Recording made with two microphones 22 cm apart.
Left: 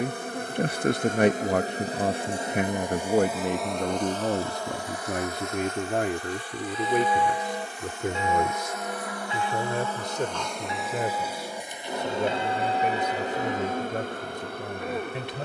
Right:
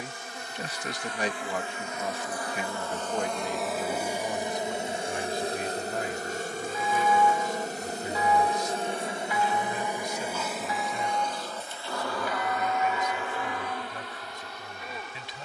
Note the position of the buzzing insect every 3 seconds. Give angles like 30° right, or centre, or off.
40° left, 20° right, 40° right, centre, 40° left.